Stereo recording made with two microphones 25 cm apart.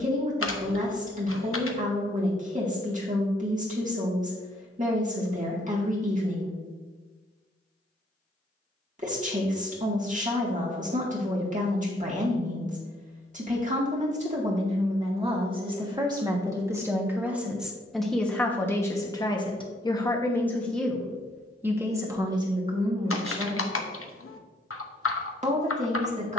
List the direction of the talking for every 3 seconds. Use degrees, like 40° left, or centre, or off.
30° right, 30° right, 30° right, 30° right, 30° right, 10° right, 10° left, 20° right, 30° right.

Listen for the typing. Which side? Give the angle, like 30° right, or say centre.
60° left.